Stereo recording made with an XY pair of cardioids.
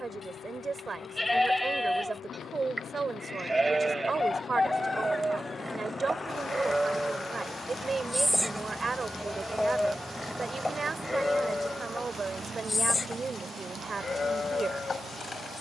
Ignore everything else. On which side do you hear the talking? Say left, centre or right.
right.